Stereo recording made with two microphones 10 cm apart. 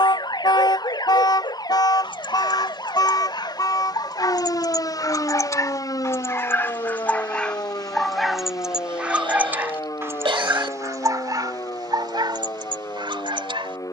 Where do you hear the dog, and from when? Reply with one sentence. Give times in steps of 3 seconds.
In this clip you hear the dog on the left from 0 s, in the centre from 6 s and on the right from 9 s.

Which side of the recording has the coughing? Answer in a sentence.
In this clip you hear the coughing on the right.